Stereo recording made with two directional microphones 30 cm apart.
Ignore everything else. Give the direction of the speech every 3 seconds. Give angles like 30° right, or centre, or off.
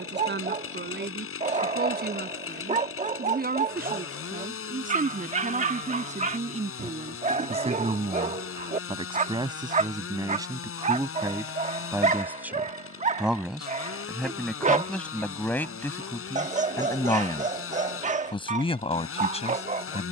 30° right, 30° right, 20° right, 10° right, centre, 10° left, 20° left.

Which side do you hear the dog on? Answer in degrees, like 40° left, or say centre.
20° right.